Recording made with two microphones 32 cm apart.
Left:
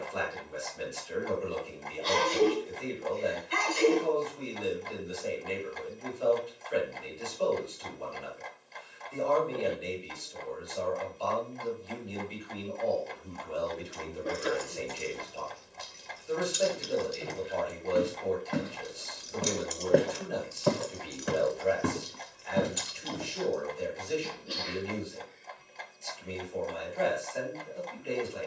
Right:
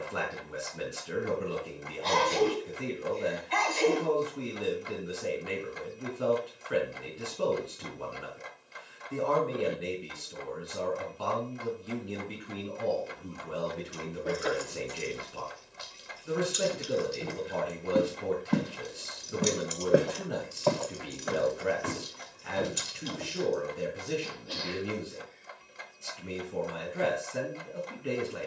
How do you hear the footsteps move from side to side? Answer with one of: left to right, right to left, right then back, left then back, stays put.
right to left.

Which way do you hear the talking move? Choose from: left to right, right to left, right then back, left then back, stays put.
stays put.